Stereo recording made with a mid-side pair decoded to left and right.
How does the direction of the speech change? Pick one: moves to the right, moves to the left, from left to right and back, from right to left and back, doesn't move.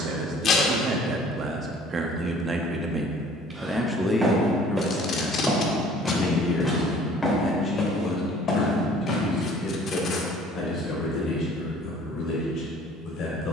moves to the left.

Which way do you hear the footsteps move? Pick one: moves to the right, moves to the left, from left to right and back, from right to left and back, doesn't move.
moves to the left.